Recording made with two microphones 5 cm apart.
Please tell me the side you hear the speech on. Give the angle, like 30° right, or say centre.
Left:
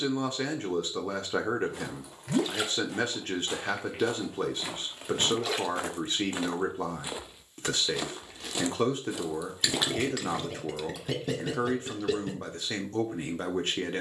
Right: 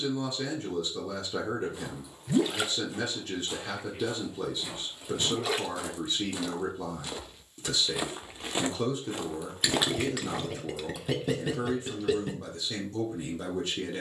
60° left.